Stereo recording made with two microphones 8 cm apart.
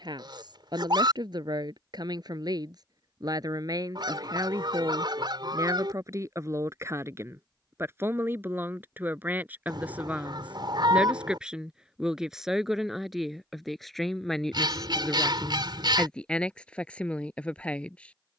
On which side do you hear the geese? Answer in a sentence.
You can hear the geese on the right.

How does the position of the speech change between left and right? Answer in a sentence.
You can hear the speech go from the right side to the left.